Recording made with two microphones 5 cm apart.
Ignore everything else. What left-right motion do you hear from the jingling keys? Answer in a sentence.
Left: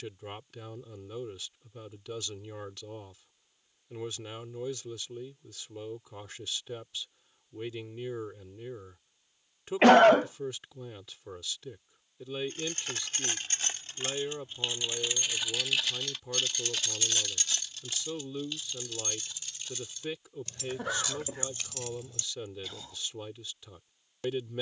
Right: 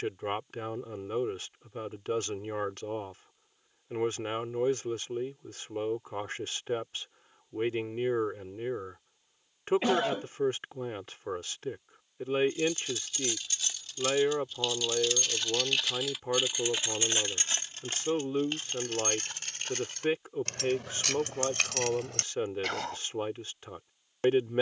In this clip you hear the jingling keys go from the left side to the right.